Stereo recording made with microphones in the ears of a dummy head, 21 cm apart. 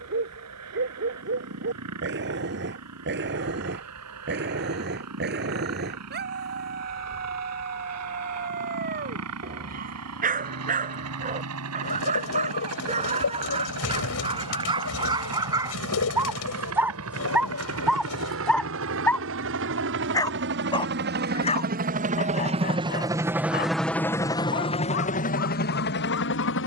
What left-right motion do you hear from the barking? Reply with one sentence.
You can hear the barking move to the left.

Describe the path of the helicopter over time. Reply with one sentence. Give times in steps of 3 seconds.
You can hear the helicopter on the right from 0 s and on the left from 24 s.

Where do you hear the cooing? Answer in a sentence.
You can hear the cooing on the left.